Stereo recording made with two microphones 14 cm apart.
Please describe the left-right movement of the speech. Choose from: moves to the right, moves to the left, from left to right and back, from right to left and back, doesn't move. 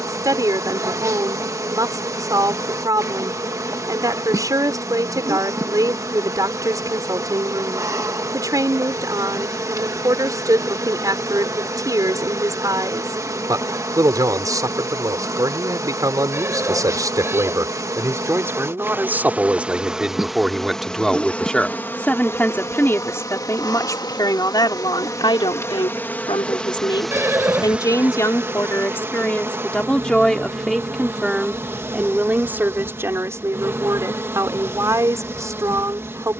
from right to left and back.